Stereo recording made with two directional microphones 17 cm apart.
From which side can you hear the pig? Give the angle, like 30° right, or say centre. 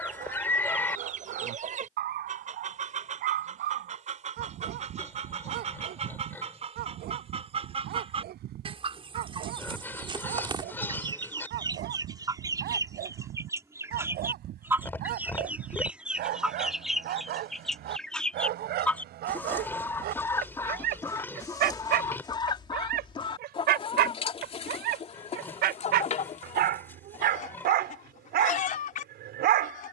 10° left.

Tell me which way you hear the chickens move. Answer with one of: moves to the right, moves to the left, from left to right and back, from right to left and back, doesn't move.
moves to the left.